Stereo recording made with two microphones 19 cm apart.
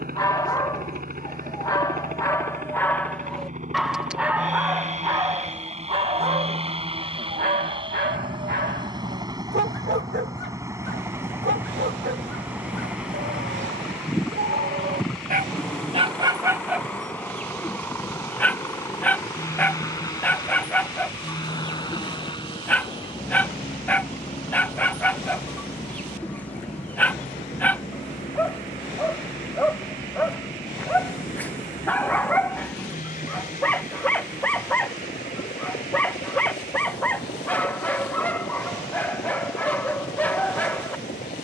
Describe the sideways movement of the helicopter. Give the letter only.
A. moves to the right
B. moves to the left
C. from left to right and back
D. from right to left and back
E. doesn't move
B.